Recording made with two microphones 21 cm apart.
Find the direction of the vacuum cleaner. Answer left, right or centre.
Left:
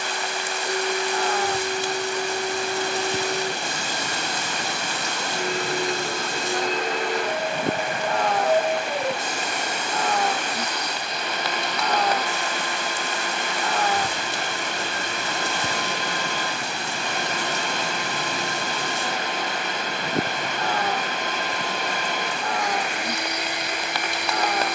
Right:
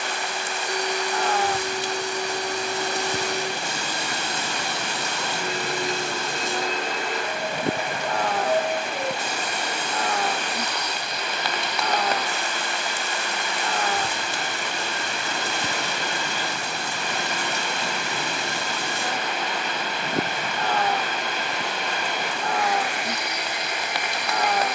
left.